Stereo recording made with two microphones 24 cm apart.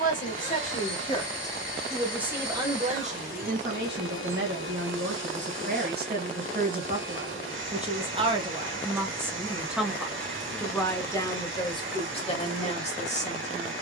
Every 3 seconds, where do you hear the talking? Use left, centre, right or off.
centre, right, right, centre, left.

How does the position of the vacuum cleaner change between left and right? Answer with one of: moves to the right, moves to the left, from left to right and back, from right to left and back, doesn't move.
doesn't move.